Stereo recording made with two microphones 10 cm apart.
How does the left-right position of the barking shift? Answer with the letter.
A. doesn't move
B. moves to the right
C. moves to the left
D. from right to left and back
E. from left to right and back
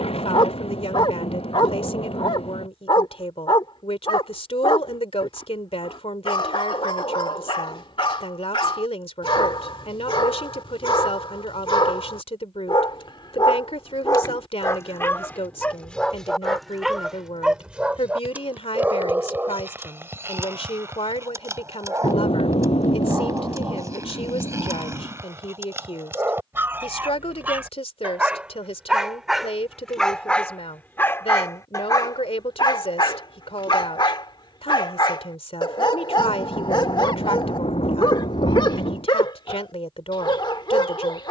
E.